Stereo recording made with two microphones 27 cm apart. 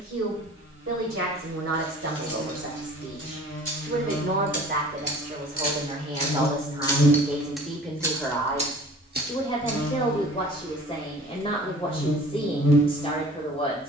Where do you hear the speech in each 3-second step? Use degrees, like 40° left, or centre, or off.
60° right, 40° right, centre, 20° left, 20° left.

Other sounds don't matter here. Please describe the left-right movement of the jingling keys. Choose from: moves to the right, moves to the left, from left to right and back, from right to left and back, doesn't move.
moves to the right.